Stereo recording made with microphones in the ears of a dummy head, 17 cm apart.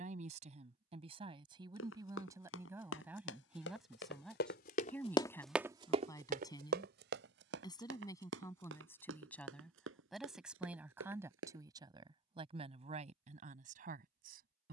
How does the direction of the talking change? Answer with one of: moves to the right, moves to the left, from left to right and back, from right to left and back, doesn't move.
from right to left and back.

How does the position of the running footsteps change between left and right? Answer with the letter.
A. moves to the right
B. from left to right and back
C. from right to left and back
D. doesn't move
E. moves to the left
A.